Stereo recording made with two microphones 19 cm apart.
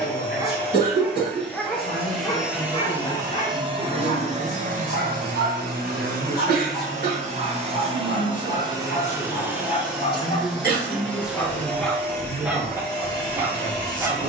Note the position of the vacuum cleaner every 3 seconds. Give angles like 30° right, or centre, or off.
10° left, 40° right, 30° right, centre, 20° left.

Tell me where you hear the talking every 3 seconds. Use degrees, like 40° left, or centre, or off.
60° left, 60° left, 50° left, 10° left, 40° right.